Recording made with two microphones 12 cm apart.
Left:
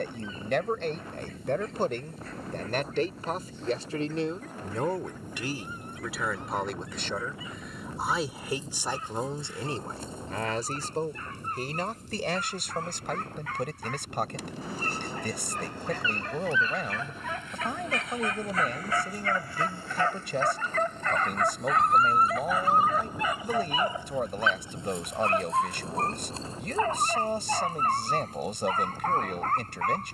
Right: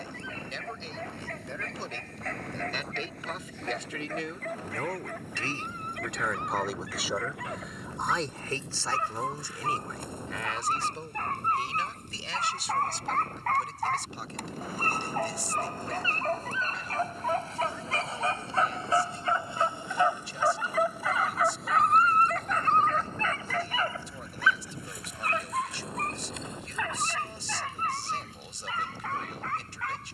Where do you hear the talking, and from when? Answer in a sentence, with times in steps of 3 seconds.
In this clip you hear the talking on the left from 0 s, in the centre from 6 s and on the left from 9 s.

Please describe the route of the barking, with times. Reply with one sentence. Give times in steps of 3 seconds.
In this clip you hear the barking on the right from 0 s, in the centre from 21 s and on the left from 24 s.